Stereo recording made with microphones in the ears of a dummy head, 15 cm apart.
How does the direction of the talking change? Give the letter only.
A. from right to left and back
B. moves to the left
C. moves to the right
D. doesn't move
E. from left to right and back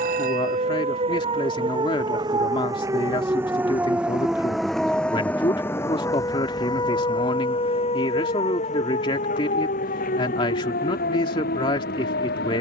D.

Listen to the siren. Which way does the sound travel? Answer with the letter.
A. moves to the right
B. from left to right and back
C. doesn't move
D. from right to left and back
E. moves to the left
E.